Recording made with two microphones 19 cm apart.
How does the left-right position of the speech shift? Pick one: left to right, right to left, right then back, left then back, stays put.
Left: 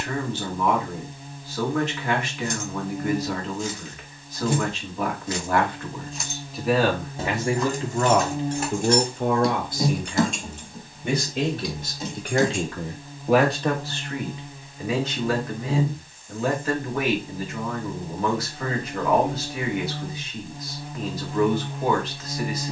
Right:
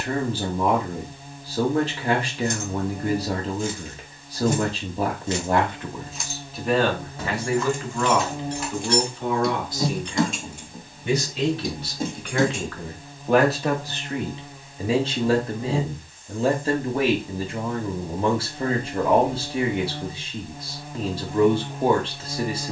left then back.